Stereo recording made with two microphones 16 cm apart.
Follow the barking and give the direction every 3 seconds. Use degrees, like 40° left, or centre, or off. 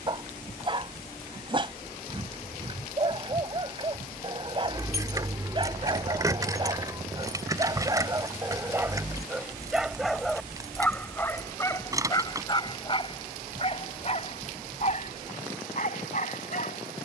30° right, 30° right, 20° right, 10° left, 40° left, 50° left.